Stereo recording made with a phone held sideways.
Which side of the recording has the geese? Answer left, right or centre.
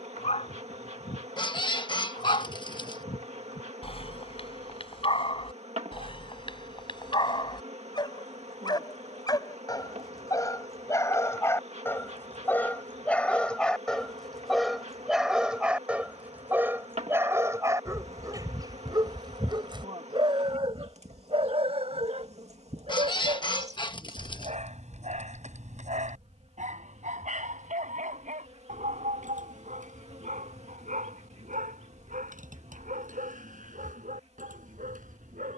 left.